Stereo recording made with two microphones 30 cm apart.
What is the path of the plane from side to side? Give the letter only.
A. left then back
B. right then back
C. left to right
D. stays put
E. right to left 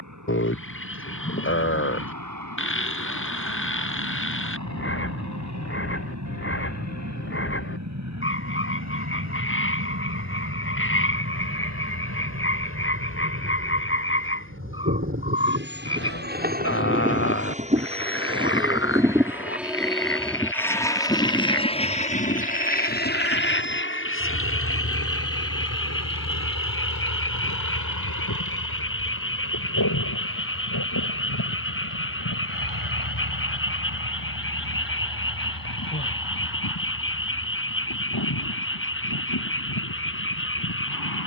E.